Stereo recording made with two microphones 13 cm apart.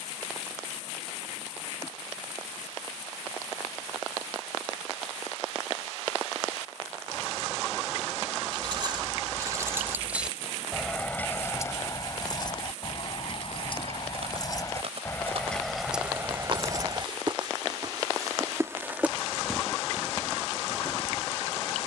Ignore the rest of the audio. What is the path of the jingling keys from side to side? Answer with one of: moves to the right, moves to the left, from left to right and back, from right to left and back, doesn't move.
from right to left and back.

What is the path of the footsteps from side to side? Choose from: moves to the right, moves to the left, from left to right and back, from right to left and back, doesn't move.
moves to the left.